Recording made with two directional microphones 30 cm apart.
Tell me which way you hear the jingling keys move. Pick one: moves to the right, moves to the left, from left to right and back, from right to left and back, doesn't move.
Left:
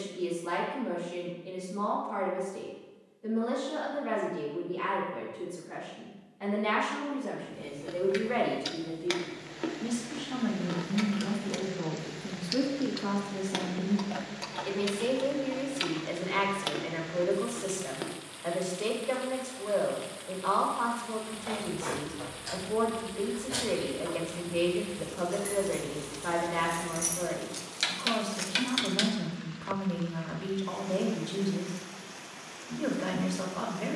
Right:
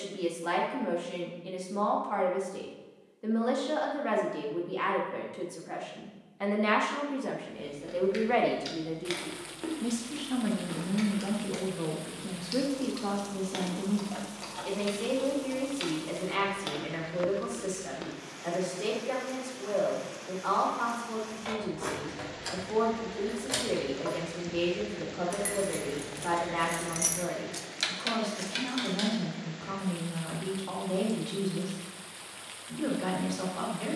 moves to the left.